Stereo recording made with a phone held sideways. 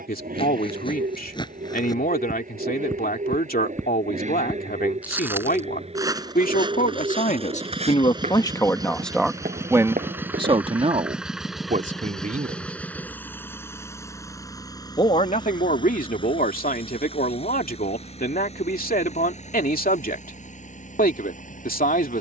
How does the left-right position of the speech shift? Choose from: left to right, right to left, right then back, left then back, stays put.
right then back.